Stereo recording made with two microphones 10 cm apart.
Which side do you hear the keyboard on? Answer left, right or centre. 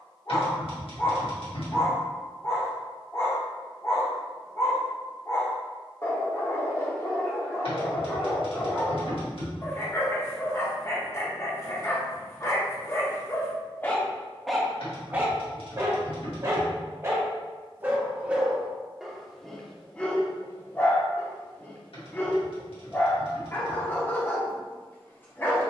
left.